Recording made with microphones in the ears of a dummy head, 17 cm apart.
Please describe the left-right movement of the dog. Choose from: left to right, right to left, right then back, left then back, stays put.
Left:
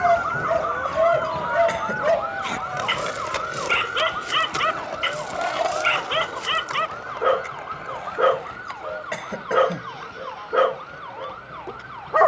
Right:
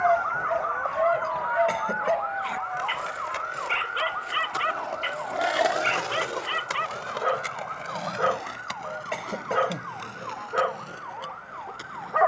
stays put.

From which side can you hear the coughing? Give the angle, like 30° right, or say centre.
10° left.